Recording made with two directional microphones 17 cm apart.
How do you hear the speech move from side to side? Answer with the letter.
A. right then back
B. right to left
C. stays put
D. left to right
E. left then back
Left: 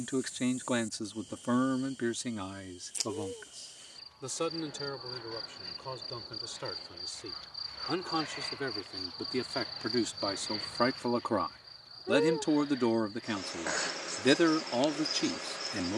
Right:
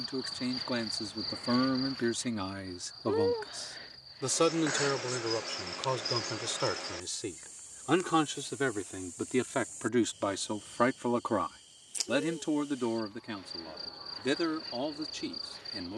A.